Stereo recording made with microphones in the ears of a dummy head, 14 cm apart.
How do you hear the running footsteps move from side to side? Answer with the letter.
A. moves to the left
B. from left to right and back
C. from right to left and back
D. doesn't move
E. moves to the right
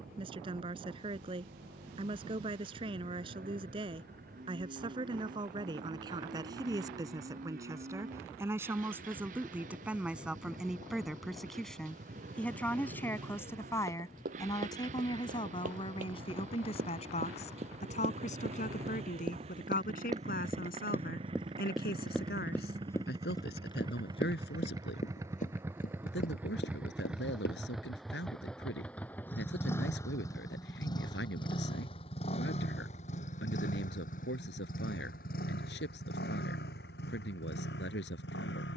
A.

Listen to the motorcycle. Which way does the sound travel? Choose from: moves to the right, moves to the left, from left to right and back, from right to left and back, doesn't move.
moves to the left.